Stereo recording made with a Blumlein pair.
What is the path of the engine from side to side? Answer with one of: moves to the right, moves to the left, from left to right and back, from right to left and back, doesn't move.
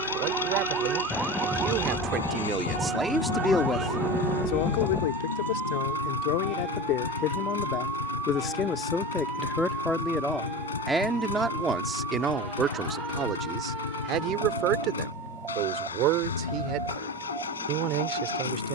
doesn't move.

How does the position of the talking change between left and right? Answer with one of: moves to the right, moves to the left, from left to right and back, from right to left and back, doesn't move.
from right to left and back.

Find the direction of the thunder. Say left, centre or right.
centre.